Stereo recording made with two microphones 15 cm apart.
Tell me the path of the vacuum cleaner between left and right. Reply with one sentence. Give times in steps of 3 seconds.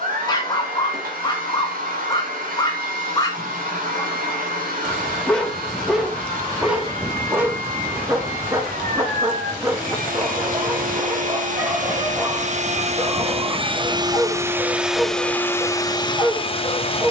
In this clip you hear the vacuum cleaner on the right from 0 s and on the left from 15 s.